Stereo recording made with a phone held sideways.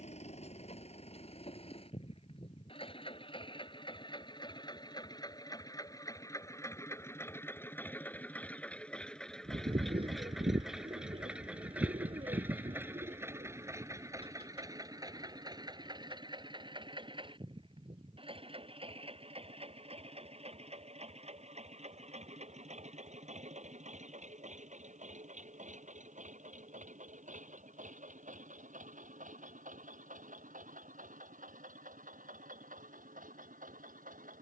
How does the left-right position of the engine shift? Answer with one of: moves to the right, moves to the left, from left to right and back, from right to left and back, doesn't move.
moves to the right.